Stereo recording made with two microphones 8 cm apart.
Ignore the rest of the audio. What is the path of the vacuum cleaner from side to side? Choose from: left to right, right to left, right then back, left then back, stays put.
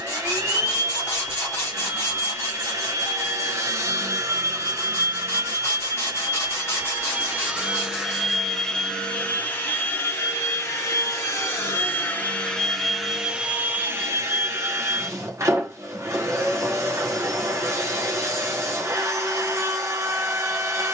left then back.